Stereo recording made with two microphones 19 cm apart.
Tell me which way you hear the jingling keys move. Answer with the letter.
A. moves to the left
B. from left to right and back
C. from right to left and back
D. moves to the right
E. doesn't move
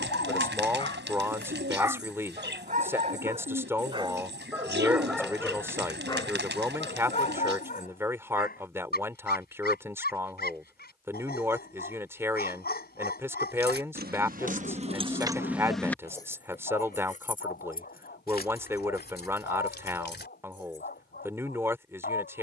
A.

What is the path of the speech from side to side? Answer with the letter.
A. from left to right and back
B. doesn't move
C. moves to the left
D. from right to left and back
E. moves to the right
B.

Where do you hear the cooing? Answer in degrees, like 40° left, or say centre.
70° right.